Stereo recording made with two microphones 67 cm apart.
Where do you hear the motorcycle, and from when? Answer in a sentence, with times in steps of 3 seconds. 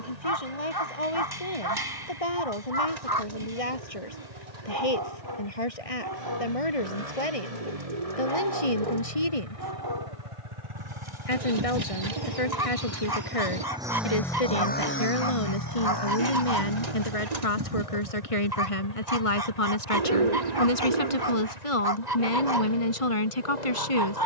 In this clip you hear the motorcycle on the right from 0 s, in the centre from 12 s and on the left from 15 s.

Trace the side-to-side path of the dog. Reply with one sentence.
In this clip you hear the dog stay put.